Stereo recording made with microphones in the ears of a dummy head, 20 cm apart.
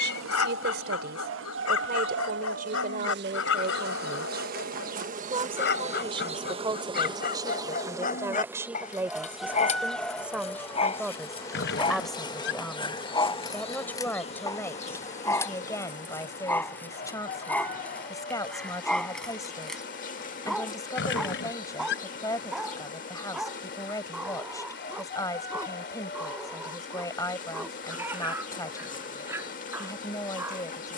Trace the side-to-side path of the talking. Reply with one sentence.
You can hear the talking go from the right side to the left.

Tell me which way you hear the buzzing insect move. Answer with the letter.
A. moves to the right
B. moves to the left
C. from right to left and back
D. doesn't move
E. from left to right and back
B.